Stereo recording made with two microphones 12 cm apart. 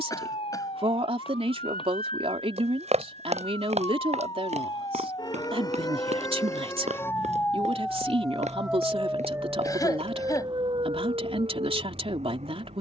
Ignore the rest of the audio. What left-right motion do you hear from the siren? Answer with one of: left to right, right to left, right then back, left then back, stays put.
left to right.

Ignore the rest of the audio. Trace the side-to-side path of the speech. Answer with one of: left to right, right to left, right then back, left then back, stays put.
stays put.